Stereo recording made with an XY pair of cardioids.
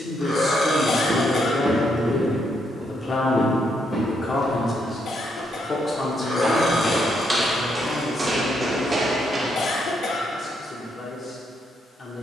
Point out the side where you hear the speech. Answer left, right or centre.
left.